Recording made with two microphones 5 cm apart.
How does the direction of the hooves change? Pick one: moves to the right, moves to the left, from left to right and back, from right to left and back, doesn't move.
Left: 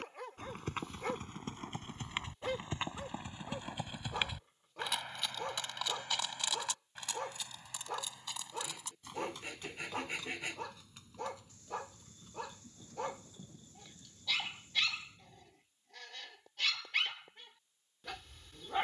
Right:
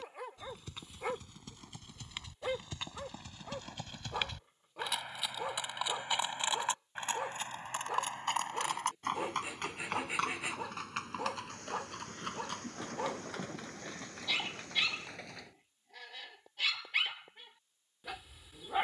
moves to the right.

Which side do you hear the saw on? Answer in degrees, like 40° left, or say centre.
10° right.